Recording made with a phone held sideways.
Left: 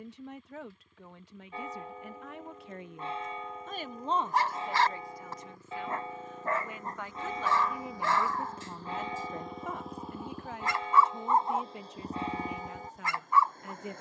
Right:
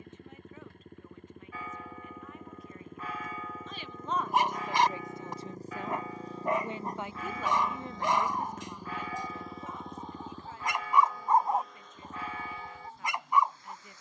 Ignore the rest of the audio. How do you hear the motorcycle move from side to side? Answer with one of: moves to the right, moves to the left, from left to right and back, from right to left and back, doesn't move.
moves to the left.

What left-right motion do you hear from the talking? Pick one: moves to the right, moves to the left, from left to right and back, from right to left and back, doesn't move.
from left to right and back.